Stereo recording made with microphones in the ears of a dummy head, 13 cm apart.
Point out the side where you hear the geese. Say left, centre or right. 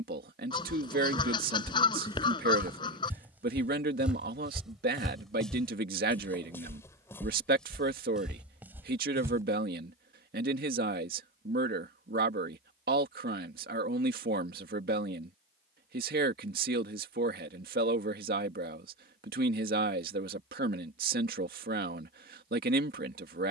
left.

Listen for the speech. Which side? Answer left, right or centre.
right.